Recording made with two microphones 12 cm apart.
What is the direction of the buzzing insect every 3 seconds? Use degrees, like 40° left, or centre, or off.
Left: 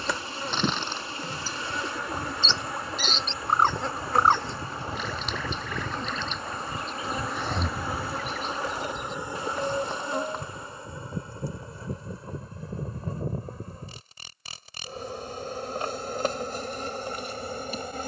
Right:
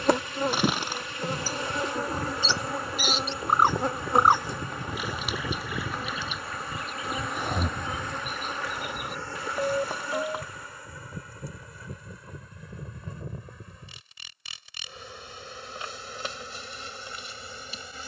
40° right, 20° right, centre, 20° left, 40° left, 50° left.